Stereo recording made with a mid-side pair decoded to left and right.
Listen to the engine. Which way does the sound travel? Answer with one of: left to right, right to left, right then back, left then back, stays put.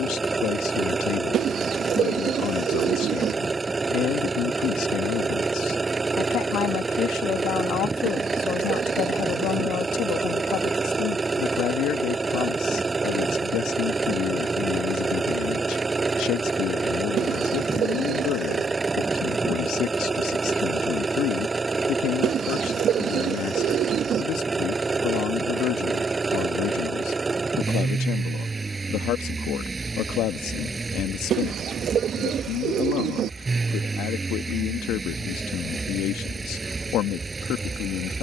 stays put.